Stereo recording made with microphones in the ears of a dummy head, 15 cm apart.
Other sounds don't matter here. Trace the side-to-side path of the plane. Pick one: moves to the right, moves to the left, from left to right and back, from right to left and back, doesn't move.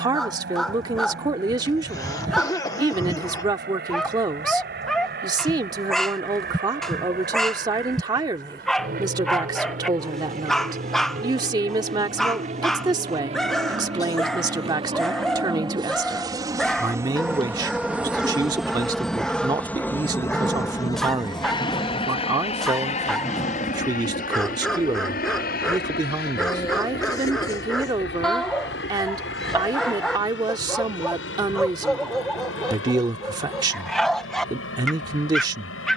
moves to the left.